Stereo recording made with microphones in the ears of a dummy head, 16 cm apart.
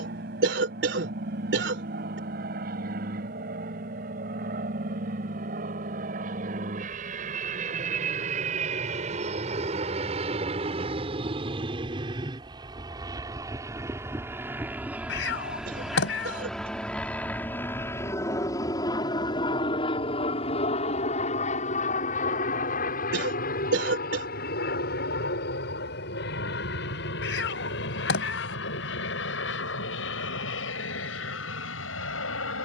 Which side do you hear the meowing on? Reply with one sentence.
In this clip you hear the meowing on the left.